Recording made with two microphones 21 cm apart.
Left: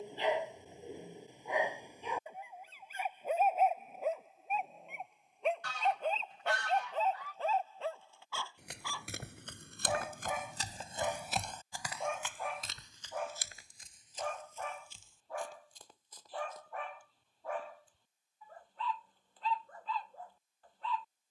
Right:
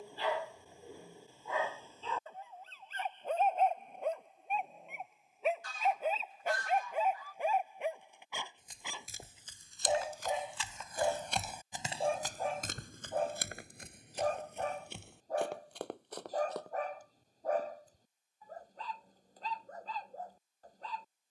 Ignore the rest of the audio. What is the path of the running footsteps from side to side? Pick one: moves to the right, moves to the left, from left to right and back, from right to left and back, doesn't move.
moves to the right.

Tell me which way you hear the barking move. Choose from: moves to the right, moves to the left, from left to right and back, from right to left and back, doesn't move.
moves to the right.